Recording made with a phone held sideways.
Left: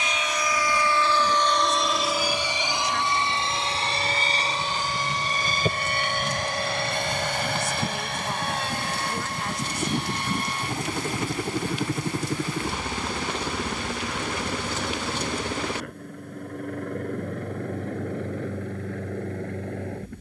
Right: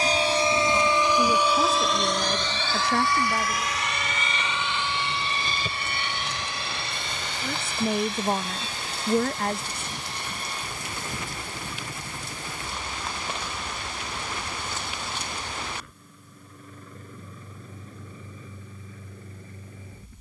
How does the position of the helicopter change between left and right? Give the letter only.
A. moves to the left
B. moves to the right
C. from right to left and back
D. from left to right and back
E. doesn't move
A.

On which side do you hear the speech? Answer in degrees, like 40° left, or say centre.
60° right.